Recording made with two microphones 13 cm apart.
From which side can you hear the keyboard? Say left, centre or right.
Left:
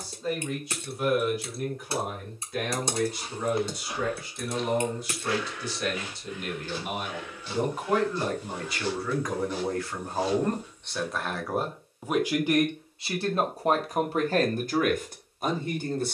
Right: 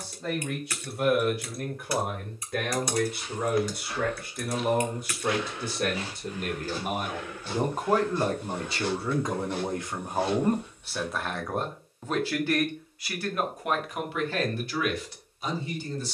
left.